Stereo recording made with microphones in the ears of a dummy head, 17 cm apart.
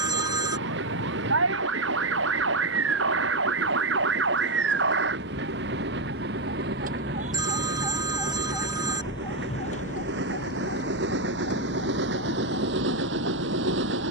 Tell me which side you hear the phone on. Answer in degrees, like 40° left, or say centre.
20° right.